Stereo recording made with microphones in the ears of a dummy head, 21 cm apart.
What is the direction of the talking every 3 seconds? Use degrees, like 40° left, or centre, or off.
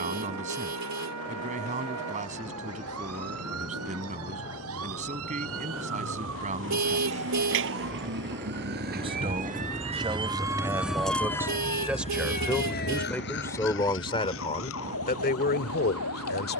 30° right, 30° right, 30° right, 20° right, 10° left, 40° left.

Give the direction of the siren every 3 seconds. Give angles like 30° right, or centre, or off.
80° right, 70° right, 60° right, 10° right, 50° left, 70° left.